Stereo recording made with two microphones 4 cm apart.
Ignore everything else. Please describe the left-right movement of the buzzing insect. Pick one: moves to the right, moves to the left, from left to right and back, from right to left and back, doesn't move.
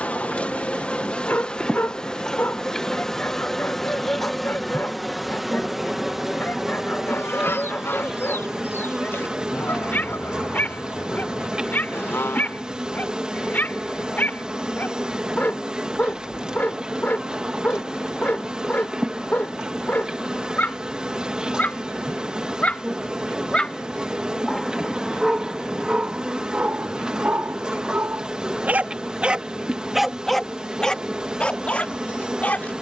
moves to the right.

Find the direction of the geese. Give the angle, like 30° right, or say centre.
70° left.